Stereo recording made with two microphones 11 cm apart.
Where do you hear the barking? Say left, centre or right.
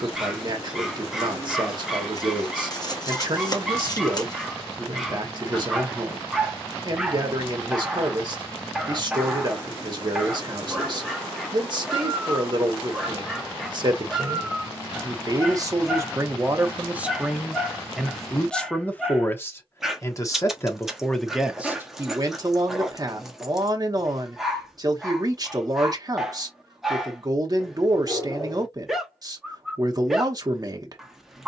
centre.